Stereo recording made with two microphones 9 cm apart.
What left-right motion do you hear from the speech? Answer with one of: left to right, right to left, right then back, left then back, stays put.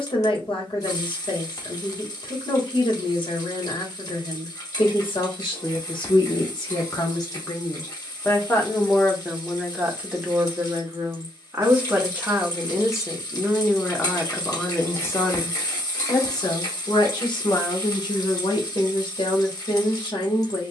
right then back.